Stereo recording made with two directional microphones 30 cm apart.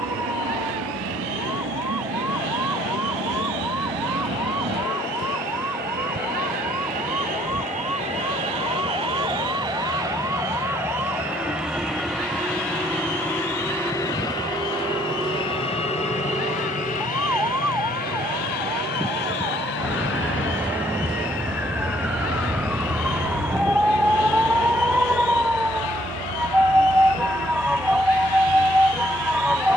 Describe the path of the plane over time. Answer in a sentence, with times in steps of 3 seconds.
In this clip you hear the plane on the right from 0 s, in the centre from 9 s, on the left from 15 s, not at all from 21 s and on the left from 24 s.